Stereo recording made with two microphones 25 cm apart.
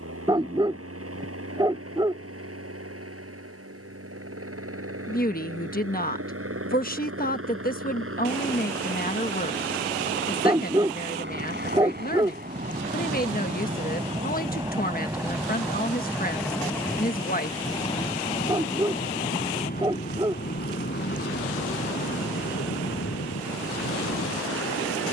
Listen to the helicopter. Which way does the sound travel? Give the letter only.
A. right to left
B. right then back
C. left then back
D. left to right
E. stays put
A.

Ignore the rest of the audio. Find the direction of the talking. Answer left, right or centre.
left.